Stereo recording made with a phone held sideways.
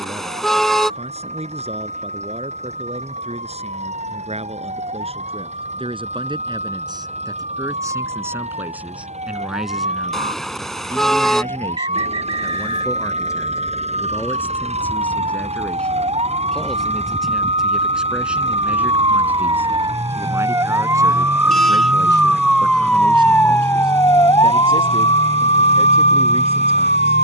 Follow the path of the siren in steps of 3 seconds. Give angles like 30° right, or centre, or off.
60° right, 60° right, 60° right, 50° right, 50° right, 40° right, 30° right, centre, 50° left.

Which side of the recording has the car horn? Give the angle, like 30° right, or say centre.
centre.